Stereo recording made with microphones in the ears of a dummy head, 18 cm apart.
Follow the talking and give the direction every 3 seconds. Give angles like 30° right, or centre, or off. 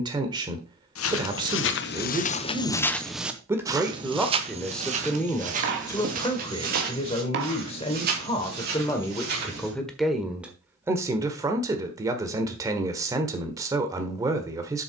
20° right, centre, 30° left, centre, 20° right.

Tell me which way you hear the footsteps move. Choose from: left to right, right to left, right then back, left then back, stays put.
left to right.